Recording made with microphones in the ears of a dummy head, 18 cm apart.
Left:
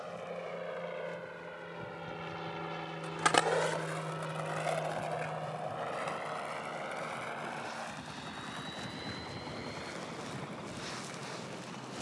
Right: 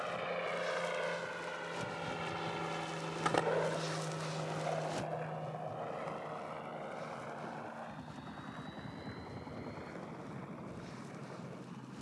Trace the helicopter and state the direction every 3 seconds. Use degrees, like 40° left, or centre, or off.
30° right, 30° left, 50° left, 70° left.